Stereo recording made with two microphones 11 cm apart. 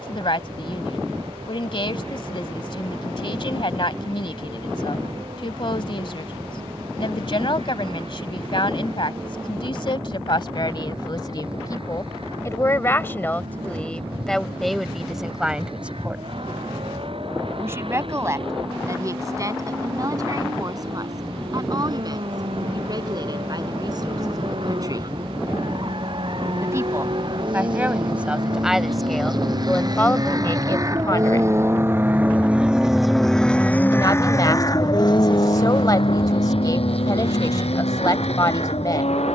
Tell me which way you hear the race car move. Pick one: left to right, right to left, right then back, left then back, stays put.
right to left.